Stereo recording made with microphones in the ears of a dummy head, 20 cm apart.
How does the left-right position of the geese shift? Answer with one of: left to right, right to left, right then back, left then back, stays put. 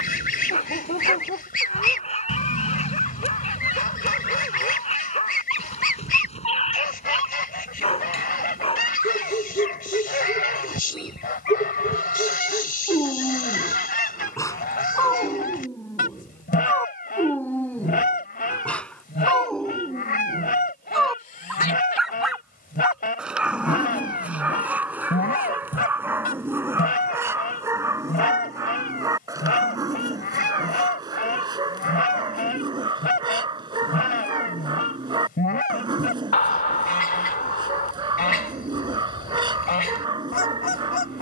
stays put.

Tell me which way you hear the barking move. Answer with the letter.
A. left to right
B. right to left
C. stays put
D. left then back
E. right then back
A.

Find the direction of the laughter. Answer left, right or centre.
left.